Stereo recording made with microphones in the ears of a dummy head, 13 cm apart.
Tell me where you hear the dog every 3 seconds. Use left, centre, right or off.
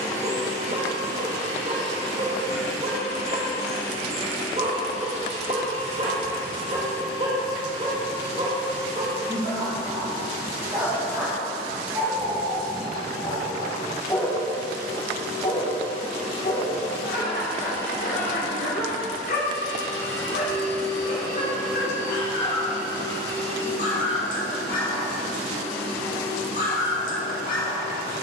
right, right, right, right, centre, left, left, left, left, left.